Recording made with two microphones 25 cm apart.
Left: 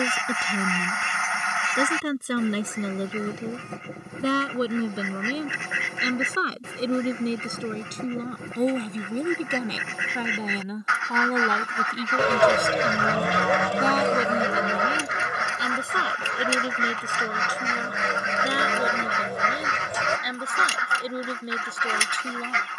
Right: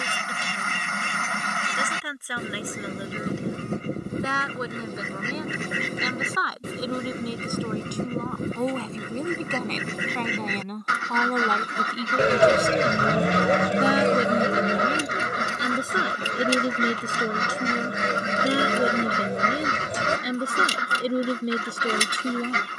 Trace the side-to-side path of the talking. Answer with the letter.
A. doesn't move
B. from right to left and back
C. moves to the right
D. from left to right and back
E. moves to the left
C.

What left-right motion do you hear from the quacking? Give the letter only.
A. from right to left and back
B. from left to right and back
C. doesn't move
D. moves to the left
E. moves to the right
C.